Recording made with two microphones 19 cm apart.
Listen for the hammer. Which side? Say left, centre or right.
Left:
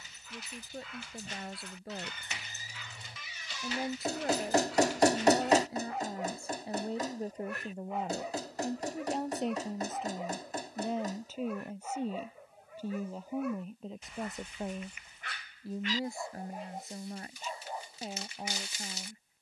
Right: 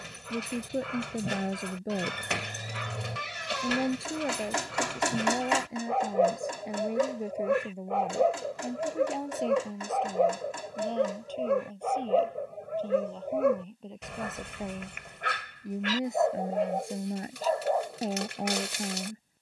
left.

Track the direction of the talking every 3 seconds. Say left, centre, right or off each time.
right, right, centre, centre, centre, right, right.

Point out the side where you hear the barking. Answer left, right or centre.
right.